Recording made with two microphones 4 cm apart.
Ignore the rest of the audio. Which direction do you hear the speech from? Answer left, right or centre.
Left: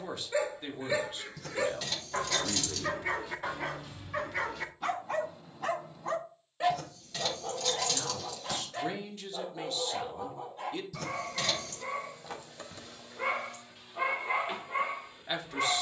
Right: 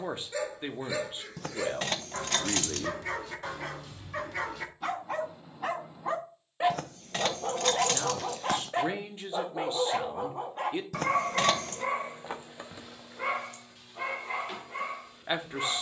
right.